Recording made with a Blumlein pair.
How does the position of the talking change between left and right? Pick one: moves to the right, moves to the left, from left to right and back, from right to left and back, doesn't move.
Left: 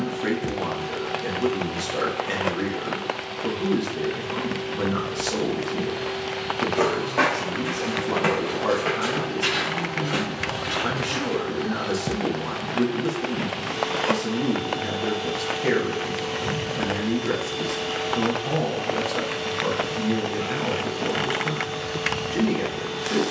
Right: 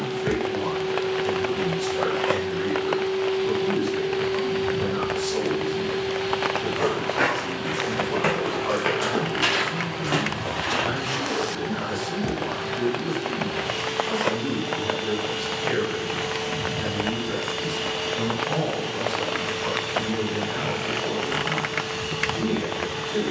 doesn't move.